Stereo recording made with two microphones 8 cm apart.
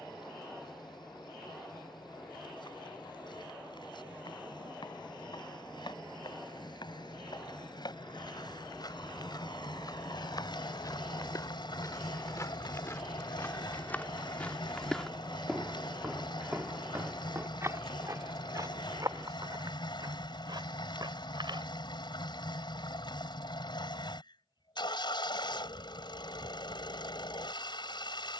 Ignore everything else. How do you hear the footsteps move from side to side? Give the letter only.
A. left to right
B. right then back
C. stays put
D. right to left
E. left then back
A.